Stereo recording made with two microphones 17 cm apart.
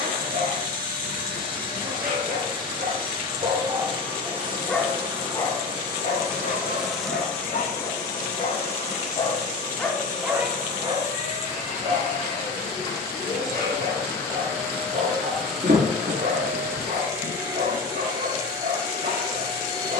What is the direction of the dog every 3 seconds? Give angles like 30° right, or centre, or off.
60° right, 10° right, 50° left, 10° right, 60° right, 60° right, 60° right.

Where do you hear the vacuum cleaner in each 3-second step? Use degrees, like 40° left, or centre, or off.
30° right, 30° right, 10° left, 40° left, 20° left, 10° right, 30° right.